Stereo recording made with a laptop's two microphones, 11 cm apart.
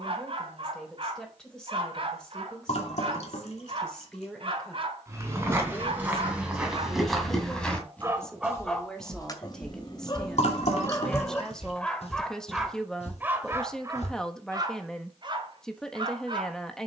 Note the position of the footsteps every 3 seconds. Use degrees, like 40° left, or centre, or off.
off, 20° right, centre, 50° left, 70° left, off.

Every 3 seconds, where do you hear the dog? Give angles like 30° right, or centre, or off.
50° right, 50° right, 30° right, 30° left, 20° right, 40° right.